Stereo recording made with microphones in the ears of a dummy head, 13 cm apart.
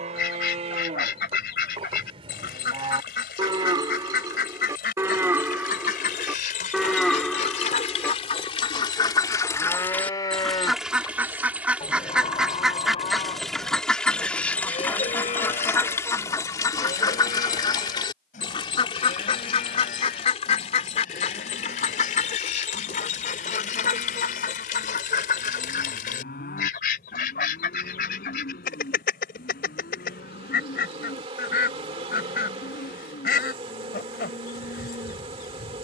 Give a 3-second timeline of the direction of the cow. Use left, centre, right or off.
right, right, centre, left, left, left, left, left, left, left, left, left.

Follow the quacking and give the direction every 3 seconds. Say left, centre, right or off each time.
left, left, left, centre, centre, left, left, left, left, left, left, left.